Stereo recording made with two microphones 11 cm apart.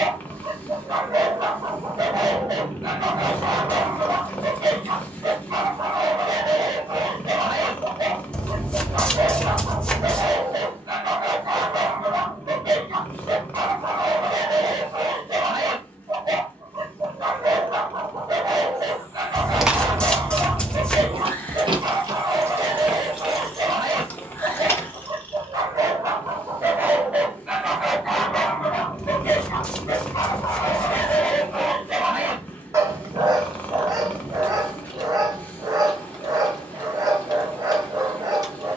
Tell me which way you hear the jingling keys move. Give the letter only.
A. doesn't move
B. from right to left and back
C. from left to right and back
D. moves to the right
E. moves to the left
C.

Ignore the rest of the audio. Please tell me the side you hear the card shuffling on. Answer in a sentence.
You can hear the card shuffling in the centre.